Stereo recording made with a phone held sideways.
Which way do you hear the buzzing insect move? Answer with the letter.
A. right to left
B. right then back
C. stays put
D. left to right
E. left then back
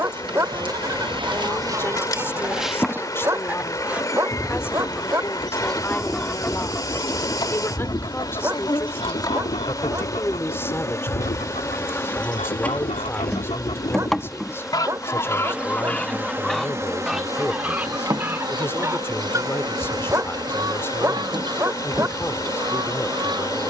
E.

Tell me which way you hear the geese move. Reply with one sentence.
In this clip you hear the geese move from right to left and back again.